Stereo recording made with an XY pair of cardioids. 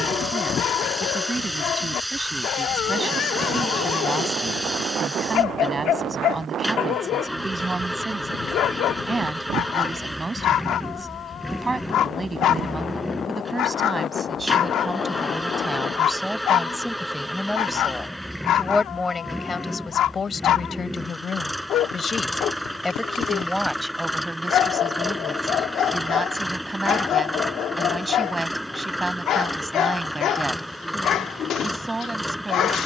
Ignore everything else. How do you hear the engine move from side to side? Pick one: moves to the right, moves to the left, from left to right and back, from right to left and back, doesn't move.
doesn't move.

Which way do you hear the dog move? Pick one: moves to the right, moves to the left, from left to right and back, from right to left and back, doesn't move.
doesn't move.